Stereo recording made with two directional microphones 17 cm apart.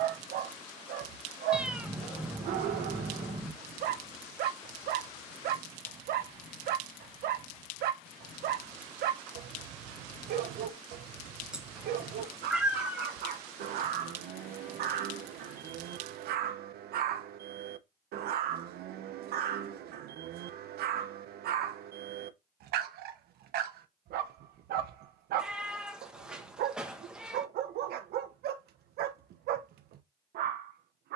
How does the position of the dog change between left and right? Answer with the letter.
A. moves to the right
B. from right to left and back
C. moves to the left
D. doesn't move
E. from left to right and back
D.